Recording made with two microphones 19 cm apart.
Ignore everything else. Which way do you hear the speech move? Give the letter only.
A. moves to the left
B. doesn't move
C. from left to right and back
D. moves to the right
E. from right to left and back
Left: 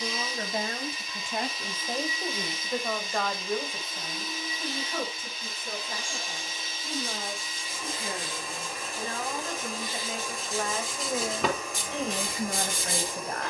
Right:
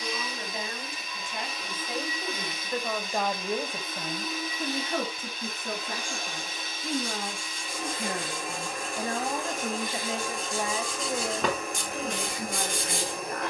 C.